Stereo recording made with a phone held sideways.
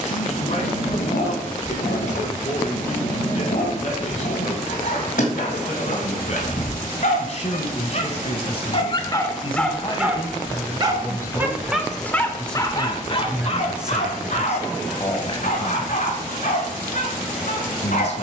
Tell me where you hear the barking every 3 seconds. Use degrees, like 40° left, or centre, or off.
70° left, 70° left, 60° left, centre, 40° left, 70° left.